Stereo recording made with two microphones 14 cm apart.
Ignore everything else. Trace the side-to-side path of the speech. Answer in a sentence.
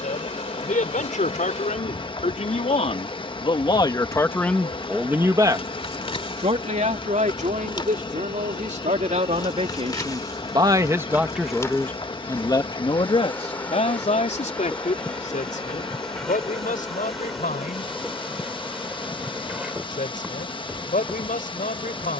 You can hear the speech go right and come back.